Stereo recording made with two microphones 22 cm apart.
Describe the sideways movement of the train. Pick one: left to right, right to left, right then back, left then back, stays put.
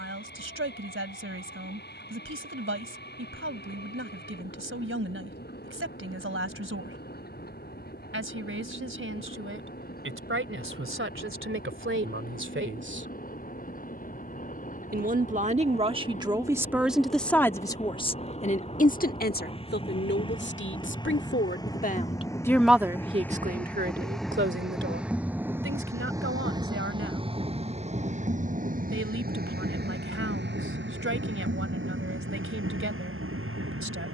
left to right.